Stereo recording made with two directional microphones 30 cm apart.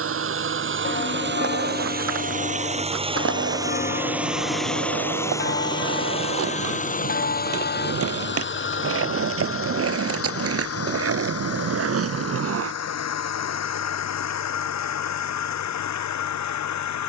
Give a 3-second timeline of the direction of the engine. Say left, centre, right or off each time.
right, centre, left, left, left, left.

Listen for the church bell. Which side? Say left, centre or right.
left.